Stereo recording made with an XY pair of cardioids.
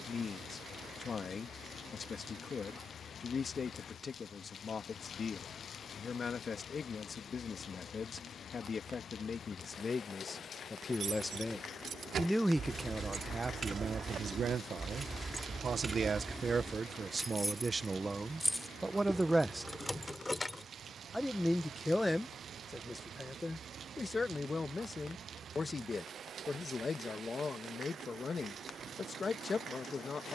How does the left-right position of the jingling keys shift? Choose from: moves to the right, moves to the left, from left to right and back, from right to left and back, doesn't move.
moves to the left.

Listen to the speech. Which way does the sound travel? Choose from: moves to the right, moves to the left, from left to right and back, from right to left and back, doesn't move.
from left to right and back.